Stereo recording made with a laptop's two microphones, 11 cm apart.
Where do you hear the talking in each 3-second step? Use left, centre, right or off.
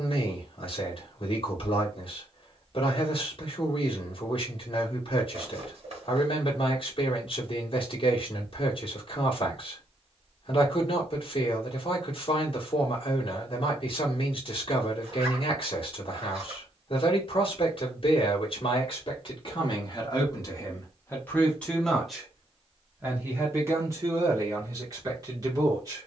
left, left, left, left, left, left, left, centre, right.